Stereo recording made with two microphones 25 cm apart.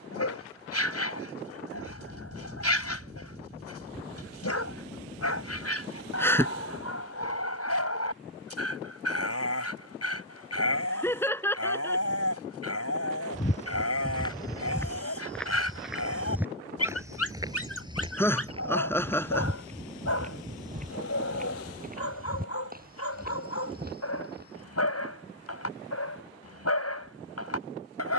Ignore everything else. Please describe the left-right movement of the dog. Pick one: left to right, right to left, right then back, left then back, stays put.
stays put.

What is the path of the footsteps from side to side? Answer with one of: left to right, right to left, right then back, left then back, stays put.
left to right.